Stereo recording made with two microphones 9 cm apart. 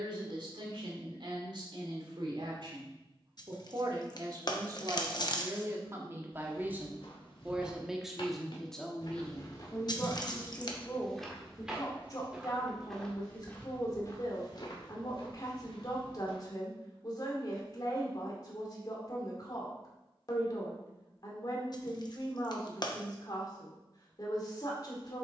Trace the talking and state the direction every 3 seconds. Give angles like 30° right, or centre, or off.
60° right, 40° right, 10° right, 20° left, 40° left, 40° left, 40° left, 40° left, 40° left.